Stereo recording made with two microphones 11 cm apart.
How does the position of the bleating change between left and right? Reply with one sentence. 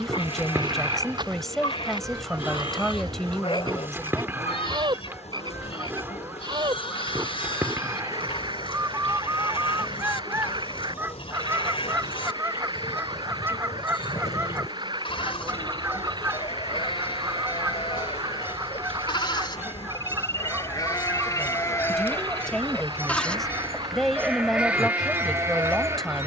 You can hear the bleating travel towards the right.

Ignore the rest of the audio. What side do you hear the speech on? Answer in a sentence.
You can hear the speech in the centre.